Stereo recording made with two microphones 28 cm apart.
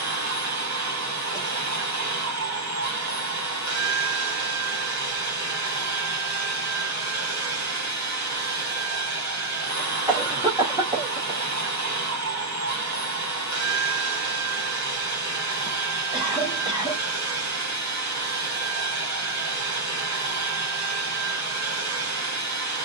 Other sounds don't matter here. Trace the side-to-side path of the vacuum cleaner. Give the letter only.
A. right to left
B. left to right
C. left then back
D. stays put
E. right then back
D.